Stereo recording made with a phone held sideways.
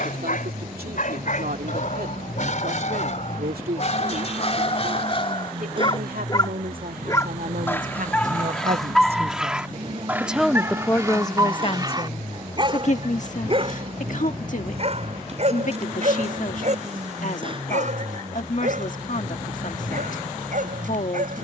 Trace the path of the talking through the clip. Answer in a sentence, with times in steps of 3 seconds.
In this clip you hear the talking on the right from 0 s, in the centre from 9 s and on the left from 12 s.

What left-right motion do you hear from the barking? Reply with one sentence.
In this clip you hear the barking move from left to right.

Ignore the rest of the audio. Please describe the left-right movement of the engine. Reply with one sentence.
In this clip you hear the engine stay in one place.